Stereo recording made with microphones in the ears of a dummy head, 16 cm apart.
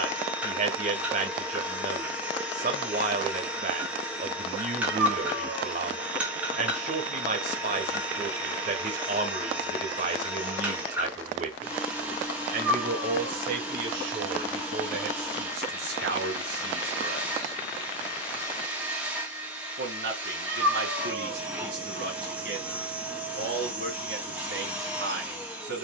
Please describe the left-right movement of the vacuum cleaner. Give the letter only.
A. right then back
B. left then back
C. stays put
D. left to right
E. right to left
C.